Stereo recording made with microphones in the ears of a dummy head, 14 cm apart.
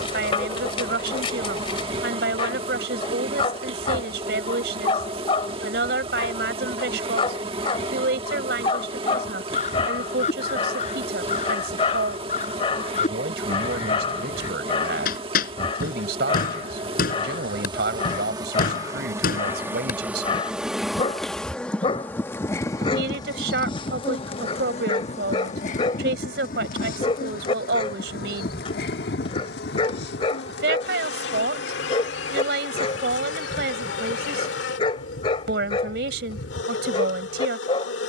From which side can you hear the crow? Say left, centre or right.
left.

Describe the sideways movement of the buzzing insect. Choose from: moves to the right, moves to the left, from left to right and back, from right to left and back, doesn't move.
moves to the left.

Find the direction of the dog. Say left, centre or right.
left.